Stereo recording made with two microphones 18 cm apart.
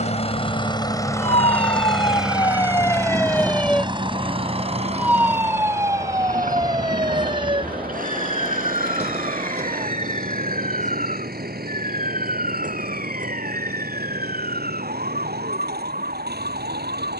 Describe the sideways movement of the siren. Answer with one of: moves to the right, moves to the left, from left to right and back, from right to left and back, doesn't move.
moves to the right.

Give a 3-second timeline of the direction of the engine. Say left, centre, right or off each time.
centre, right, right, right, right, right.